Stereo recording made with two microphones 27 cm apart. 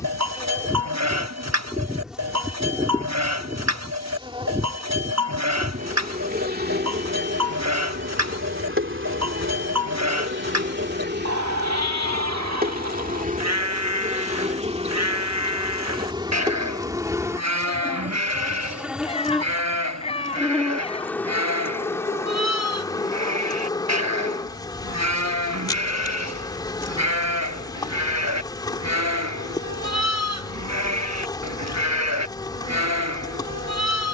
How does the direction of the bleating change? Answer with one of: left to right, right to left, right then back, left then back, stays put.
stays put.